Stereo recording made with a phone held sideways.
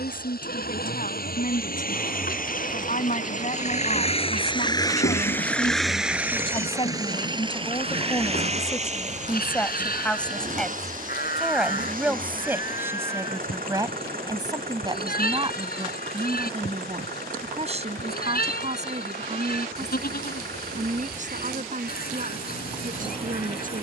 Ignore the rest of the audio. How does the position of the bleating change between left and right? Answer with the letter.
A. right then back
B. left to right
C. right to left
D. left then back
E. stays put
E.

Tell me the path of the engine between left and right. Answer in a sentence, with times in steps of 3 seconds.
In this clip you hear the engine on the left from 0 s and on the right from 6 s.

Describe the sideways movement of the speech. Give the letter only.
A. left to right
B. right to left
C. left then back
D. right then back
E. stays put
A.